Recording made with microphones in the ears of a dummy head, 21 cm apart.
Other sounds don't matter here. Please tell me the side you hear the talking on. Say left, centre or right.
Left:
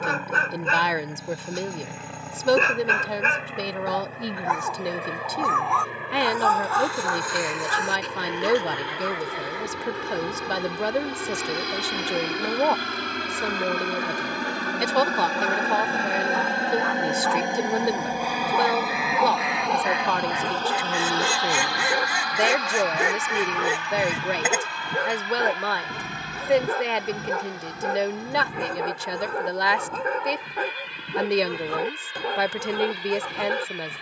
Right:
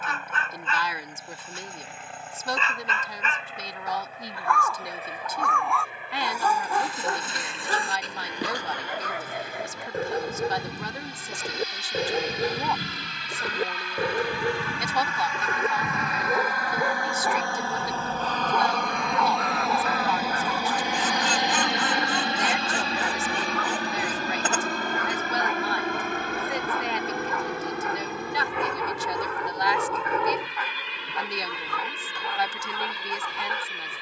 left.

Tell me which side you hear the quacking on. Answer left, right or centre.
centre.